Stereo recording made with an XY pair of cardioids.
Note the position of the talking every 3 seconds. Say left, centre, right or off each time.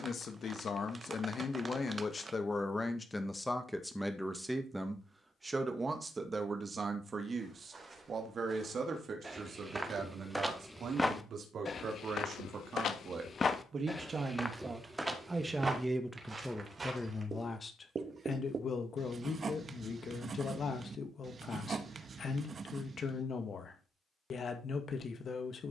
left, centre, right, right, right, centre, left, left, left.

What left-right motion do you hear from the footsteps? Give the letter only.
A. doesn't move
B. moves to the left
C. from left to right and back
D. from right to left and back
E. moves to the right
D.